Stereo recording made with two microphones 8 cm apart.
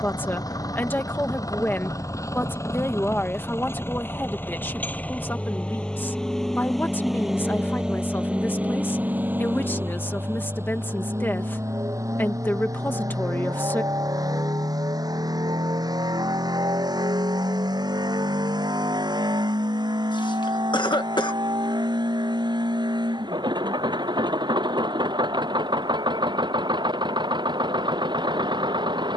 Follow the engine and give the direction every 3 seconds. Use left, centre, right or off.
left, left, centre, right, right, right, right, right, right, right.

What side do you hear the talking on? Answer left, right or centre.
left.